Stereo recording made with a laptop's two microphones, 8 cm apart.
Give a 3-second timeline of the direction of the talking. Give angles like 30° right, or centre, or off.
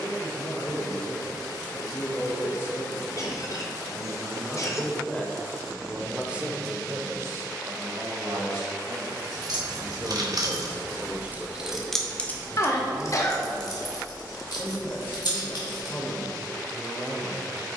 30° left, 20° left, 40° right, 30° right, 20° left, 30° left.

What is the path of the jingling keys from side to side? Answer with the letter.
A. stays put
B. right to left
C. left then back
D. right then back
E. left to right
B.